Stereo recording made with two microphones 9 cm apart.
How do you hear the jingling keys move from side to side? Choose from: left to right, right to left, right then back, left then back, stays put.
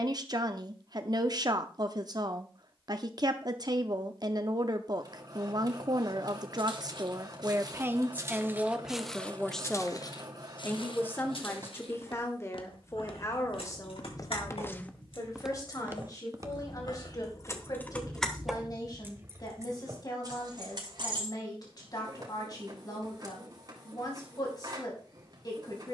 left to right.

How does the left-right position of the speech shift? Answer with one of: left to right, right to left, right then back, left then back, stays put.
right to left.